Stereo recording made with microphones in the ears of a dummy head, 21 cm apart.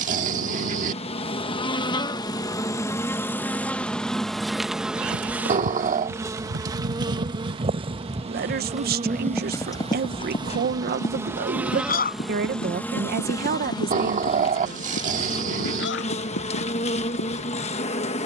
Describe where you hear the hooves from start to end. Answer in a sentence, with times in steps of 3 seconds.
In this clip you hear the hooves not at all from 0 s, on the right from 3 s and on the left from 9 s.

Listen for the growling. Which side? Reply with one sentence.
You can hear the growling on the right.